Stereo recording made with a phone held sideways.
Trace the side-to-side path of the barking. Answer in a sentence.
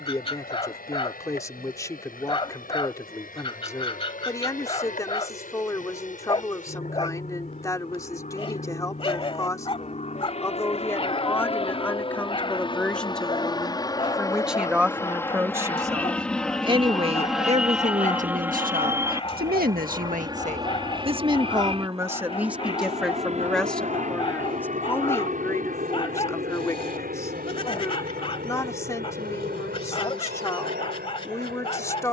You can hear the barking stay put.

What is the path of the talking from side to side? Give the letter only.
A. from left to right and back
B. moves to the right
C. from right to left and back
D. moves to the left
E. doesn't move
A.